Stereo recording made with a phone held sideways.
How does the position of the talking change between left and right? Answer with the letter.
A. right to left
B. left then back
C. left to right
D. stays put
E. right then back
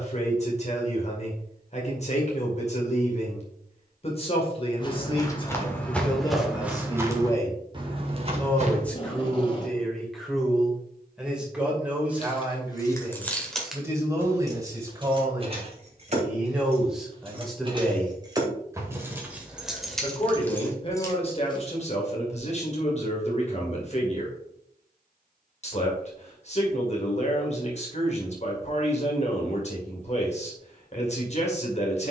E.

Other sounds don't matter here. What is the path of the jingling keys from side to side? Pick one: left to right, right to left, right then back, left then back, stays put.
right then back.